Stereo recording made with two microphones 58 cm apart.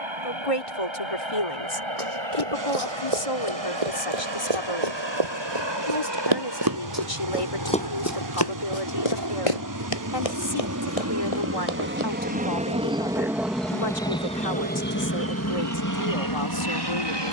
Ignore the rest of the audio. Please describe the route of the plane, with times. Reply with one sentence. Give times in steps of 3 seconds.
In this clip you hear the plane on the right from 0 s, in the centre from 12 s and on the left from 15 s.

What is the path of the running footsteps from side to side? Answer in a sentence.
In this clip you hear the running footsteps go from the right side to the left.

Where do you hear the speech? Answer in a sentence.
You can hear the speech on the left.